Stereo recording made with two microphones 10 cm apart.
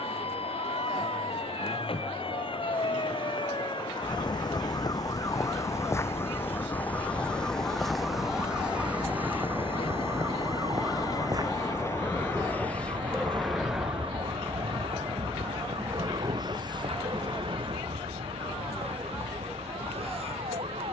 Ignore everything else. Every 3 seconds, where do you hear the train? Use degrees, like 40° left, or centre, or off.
80° left, 70° left, 60° left, 40° left, centre, 40° right, 60° right.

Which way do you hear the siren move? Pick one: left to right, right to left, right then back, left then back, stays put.
left to right.